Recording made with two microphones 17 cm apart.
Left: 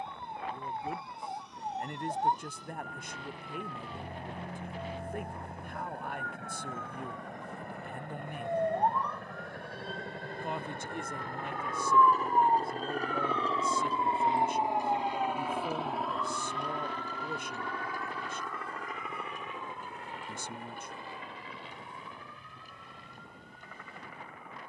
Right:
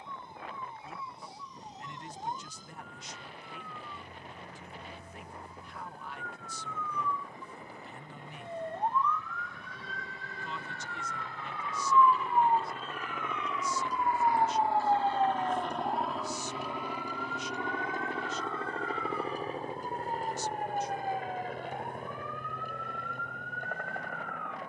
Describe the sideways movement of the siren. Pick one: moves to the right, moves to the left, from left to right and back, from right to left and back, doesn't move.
moves to the right.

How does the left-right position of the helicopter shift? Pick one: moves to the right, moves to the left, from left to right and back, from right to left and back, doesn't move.
moves to the right.